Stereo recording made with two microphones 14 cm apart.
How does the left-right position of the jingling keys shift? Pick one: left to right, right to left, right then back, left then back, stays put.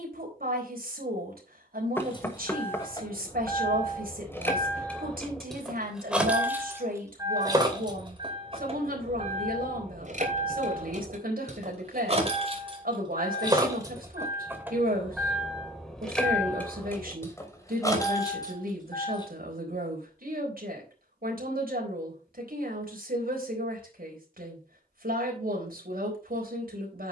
right then back.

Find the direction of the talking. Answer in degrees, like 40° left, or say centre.
80° right.